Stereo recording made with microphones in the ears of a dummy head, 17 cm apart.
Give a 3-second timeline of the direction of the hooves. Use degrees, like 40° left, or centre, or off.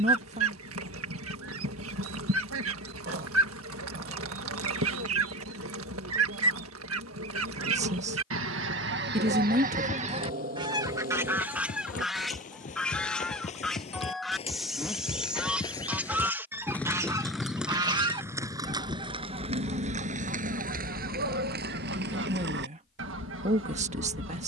off, off, off, 50° left, 40° left, 10° left, 30° right, 60° right.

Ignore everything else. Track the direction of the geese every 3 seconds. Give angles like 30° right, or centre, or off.
80° right, 80° right, 70° right, 30° right, centre, 10° right, 40° right, 60° right.